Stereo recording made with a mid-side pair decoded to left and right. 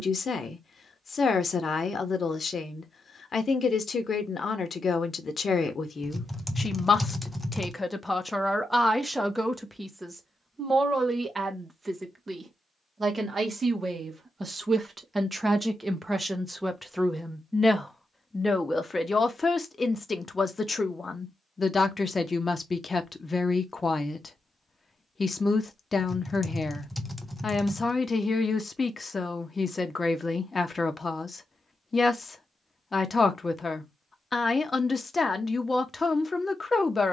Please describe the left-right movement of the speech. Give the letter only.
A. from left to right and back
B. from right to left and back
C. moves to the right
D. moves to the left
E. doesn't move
A.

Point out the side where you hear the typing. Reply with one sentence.
You can hear the typing in the centre.